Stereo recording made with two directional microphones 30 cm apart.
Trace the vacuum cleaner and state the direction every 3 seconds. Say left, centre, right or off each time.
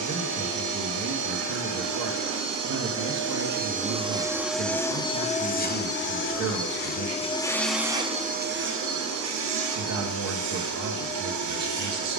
right, centre, centre, right.